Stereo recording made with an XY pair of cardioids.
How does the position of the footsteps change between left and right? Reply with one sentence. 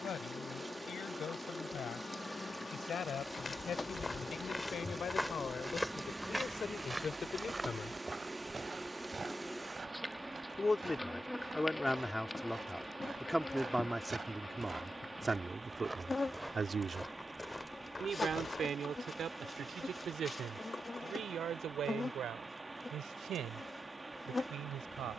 You can hear the footsteps move from left to right and back again.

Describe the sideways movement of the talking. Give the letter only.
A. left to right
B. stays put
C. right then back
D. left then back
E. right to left
A.